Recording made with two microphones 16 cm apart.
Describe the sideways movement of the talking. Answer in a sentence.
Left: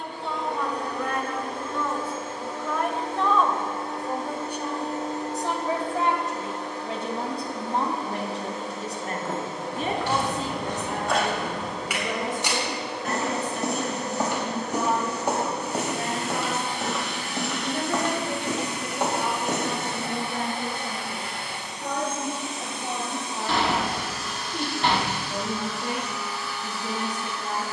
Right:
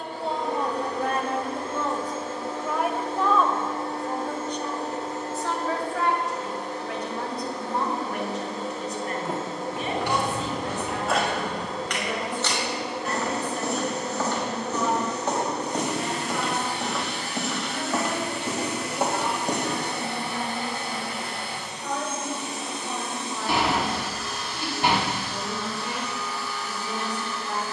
In this clip you hear the talking travel towards the left.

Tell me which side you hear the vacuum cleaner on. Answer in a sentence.
In this clip you hear the vacuum cleaner on the right.